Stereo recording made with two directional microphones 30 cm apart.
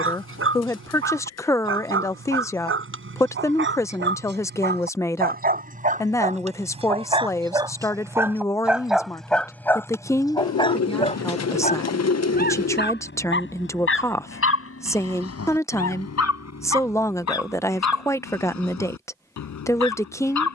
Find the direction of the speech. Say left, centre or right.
centre.